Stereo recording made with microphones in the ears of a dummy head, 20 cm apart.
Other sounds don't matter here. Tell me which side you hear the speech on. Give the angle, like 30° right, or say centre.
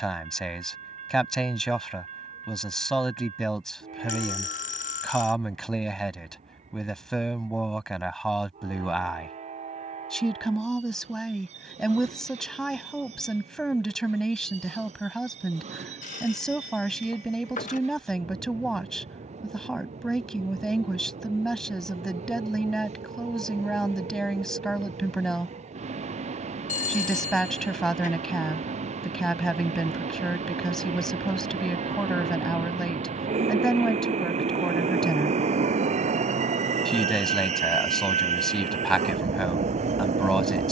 centre.